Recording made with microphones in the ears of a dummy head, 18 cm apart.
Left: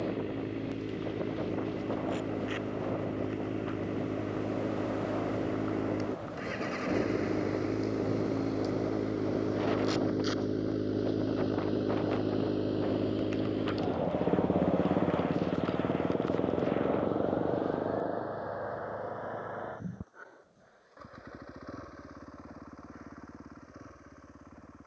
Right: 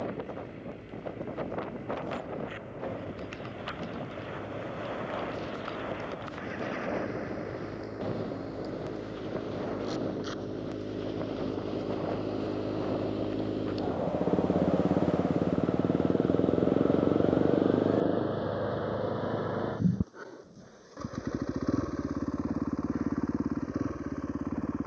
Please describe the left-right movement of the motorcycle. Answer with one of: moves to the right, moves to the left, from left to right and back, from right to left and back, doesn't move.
moves to the right.